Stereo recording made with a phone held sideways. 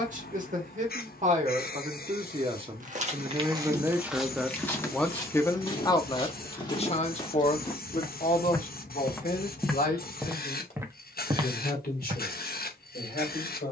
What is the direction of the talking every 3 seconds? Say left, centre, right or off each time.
right, centre, left, left, left.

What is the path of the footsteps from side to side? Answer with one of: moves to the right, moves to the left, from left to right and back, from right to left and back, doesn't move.
from right to left and back.